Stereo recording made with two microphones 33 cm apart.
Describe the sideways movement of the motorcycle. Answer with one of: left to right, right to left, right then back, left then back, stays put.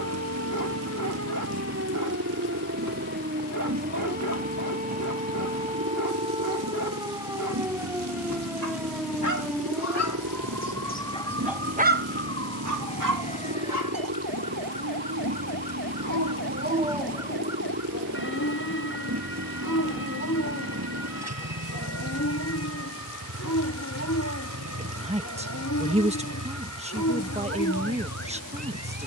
stays put.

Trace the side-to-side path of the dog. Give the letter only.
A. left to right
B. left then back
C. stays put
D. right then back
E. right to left
D.